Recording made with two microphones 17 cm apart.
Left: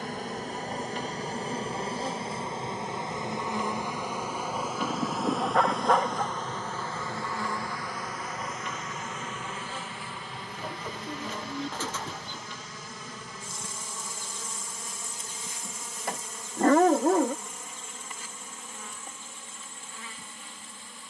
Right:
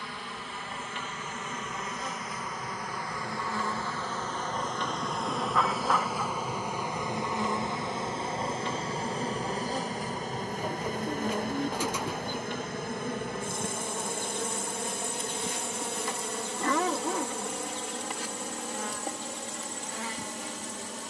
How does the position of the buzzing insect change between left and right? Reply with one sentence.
You can hear the buzzing insect move from left to right.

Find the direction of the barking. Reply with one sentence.
In this clip you hear the barking on the left.